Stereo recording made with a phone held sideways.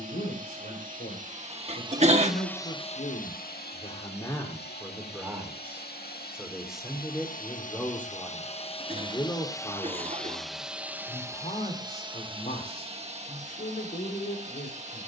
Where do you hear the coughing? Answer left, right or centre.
right.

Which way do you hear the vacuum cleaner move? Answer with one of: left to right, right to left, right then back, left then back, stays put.
left then back.